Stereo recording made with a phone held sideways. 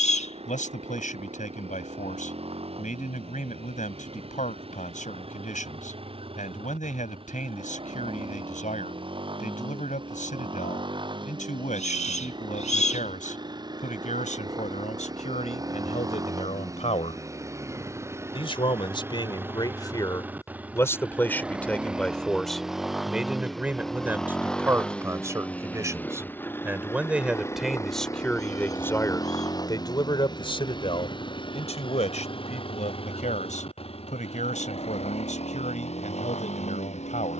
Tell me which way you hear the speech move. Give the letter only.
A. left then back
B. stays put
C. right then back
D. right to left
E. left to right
C.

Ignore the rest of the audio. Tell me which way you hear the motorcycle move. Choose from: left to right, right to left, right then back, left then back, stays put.
right to left.